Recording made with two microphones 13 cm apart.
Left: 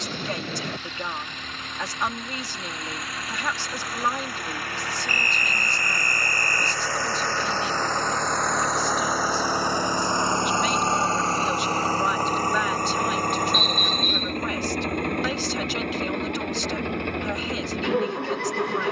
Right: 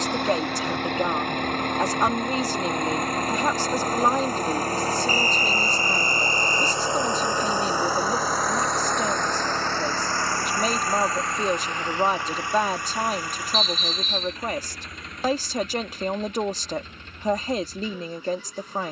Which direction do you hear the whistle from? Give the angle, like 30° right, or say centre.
50° left.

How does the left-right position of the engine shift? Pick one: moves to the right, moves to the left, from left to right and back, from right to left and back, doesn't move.
moves to the left.